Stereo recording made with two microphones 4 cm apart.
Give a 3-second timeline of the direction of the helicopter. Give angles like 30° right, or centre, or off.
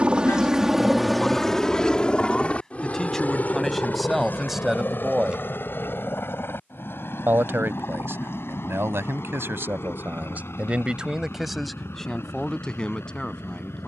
10° left, 50° left, 60° left, 60° left, 70° left.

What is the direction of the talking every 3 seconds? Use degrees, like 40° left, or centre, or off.
20° left, centre, 70° right, 40° right, 20° left.